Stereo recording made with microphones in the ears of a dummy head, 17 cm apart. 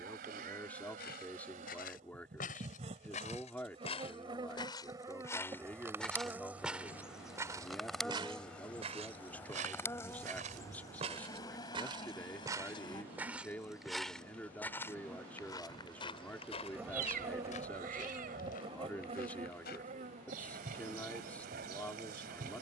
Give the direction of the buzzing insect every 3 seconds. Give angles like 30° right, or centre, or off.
40° right, 20° right, centre, 20° left, 20° left, 10° right, 40° right, 50° right.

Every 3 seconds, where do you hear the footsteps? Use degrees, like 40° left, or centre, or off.
50° left, 20° left, 20° right, 30° right, centre, 30° left, 50° left, off.